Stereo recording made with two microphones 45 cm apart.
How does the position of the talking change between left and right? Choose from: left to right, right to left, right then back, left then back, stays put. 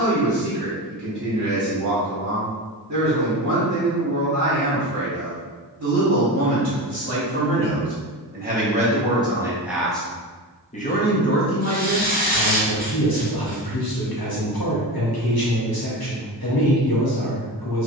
right to left.